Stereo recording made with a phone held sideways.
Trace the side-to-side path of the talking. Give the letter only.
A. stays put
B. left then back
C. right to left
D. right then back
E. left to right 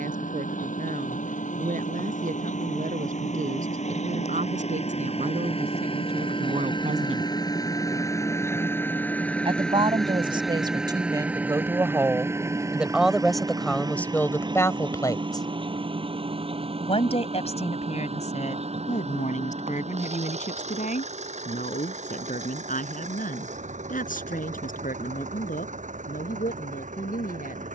C.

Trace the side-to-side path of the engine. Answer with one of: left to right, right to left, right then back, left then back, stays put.
left to right.